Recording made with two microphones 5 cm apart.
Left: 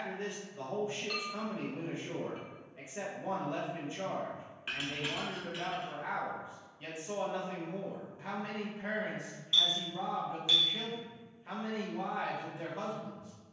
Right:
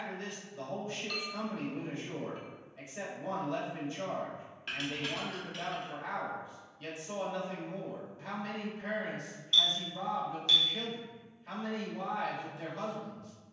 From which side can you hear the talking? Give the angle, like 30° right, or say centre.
20° left.